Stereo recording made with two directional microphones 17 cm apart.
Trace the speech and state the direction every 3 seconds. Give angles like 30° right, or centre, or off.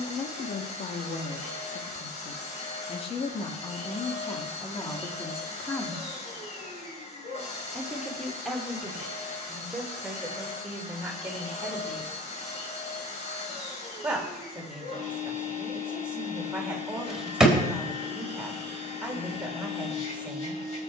50° left, 20° left, centre, 10° right, 10° right, 10° right, 10° right.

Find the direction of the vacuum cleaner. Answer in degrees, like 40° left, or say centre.
40° left.